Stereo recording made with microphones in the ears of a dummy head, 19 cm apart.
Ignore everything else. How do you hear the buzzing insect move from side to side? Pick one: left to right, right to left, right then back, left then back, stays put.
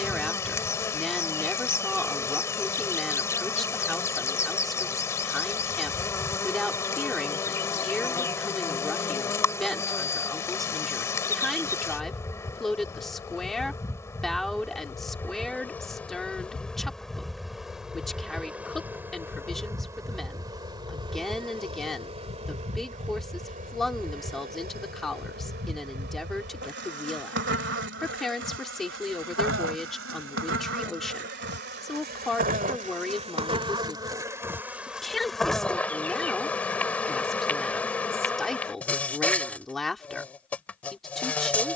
right then back.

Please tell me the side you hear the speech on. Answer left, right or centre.
centre.